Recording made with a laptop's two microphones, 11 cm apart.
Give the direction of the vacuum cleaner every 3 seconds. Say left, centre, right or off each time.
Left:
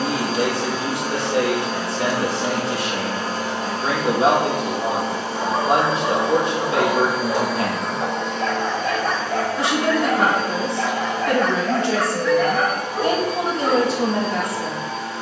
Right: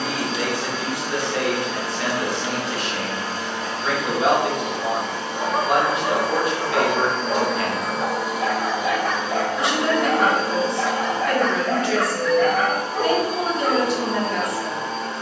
left, left, centre, right, right.